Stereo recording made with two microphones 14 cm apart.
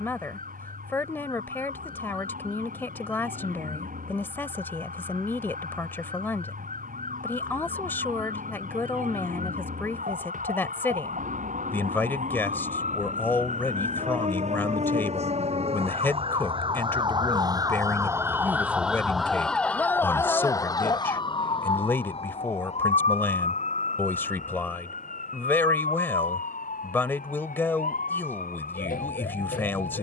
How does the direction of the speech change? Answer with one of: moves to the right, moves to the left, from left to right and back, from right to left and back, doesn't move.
doesn't move.